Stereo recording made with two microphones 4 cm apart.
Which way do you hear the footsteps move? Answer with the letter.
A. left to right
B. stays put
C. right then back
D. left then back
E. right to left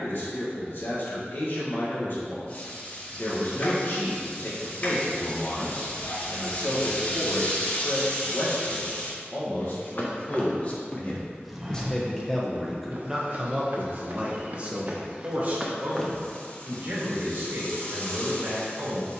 C.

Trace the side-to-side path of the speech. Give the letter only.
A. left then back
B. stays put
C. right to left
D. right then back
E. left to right
E.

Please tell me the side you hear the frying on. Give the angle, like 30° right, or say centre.
40° left.